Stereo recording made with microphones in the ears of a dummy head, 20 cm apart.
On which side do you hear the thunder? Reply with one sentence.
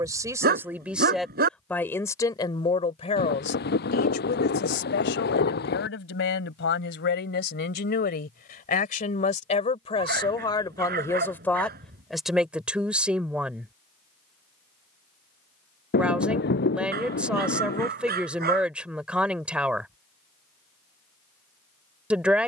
In this clip you hear the thunder on the left.